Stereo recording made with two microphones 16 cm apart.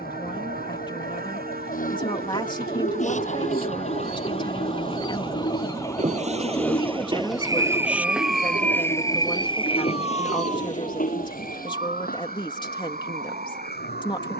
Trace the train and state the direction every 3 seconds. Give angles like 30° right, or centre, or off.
70° right, 60° right, 20° right, 40° left, 70° left.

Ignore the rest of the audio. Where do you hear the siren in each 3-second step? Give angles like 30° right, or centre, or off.
60° left, 30° left, centre, 40° right, 50° right.